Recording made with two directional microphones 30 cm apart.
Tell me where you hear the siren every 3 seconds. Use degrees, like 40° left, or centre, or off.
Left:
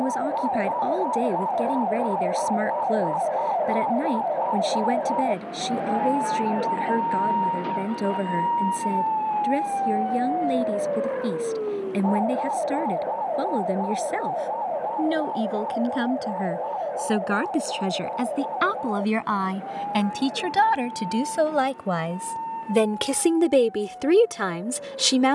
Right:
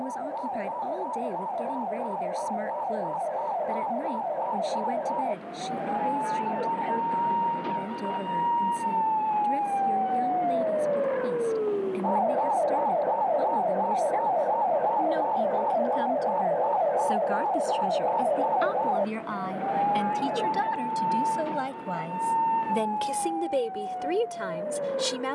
40° left, 30° left, 20° left, centre, 20° right, 30° right, 40° right, 50° right, 50° right.